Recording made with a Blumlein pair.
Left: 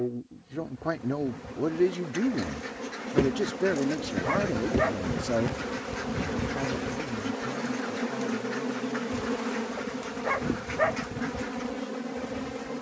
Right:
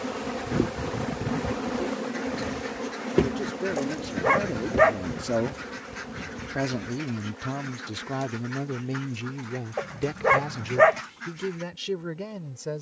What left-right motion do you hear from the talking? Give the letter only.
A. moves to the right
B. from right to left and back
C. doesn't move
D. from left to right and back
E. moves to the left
A.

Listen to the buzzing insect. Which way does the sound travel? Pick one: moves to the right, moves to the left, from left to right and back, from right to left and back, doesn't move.
moves to the left.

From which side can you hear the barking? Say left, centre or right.
right.